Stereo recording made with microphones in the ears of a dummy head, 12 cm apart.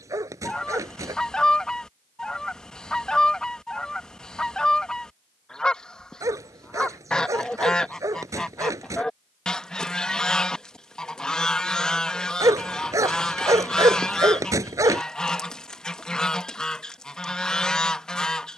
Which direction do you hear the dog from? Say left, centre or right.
right.